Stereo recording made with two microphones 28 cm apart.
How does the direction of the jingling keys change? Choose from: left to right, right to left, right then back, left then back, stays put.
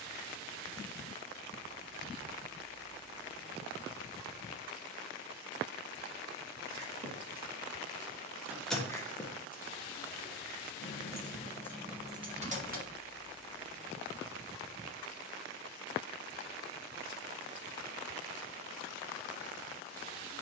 left then back.